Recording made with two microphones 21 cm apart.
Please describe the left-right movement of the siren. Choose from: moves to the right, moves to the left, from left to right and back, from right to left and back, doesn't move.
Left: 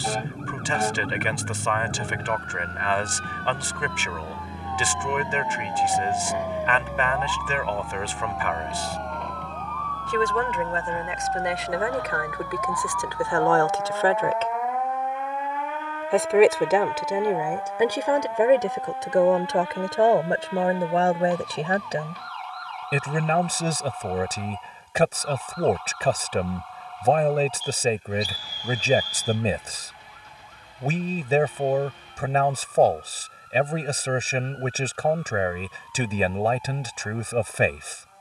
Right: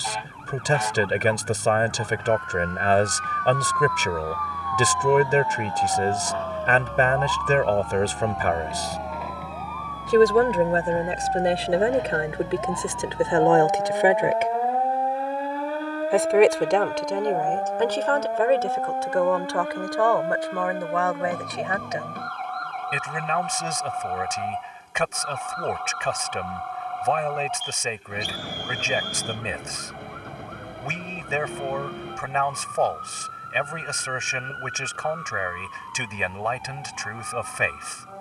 moves to the right.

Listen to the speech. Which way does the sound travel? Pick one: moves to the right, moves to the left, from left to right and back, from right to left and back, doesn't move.
moves to the left.